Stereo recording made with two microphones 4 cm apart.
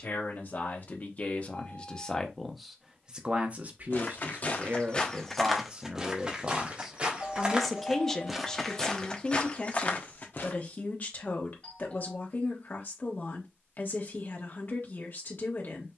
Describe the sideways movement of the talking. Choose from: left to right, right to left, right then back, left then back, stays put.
right then back.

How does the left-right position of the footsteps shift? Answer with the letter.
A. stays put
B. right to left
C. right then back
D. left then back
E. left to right
C.